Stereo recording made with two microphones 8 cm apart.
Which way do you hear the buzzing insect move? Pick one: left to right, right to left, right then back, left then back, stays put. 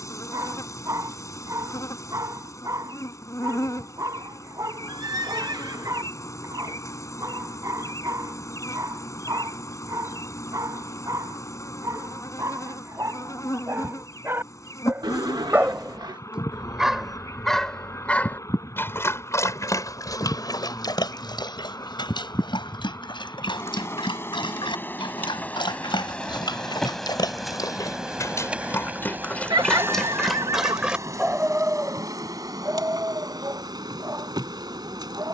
left to right.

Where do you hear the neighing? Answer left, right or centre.
right.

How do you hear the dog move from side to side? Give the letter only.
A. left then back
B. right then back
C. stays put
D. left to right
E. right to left
A.